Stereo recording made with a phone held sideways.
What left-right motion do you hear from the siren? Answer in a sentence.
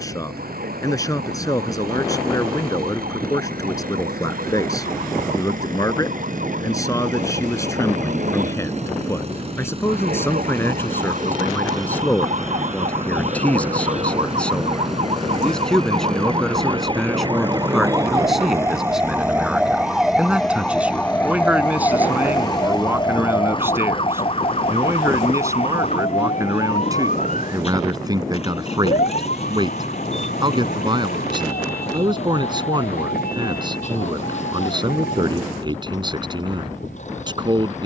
You can hear the siren move to the left.